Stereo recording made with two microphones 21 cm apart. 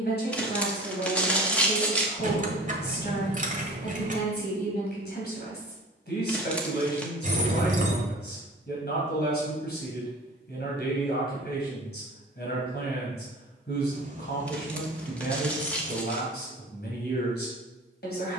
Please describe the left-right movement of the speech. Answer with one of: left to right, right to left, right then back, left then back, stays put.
stays put.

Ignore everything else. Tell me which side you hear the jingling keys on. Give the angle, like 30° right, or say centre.
40° right.